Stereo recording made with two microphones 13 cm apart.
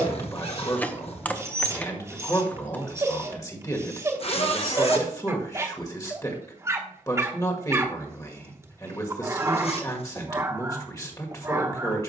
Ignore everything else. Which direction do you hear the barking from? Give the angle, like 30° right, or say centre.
20° right.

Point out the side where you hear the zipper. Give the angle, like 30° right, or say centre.
50° left.